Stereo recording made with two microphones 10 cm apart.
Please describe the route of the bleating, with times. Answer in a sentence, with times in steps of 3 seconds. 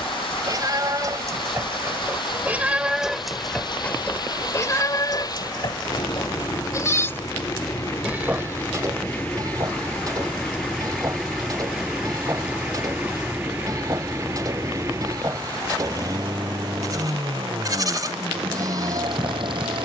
You can hear the bleating on the right from 0 s, on the left from 3 s, in the centre from 6 s and on the right from 9 s.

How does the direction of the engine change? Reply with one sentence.
In this clip you hear the engine travel towards the right.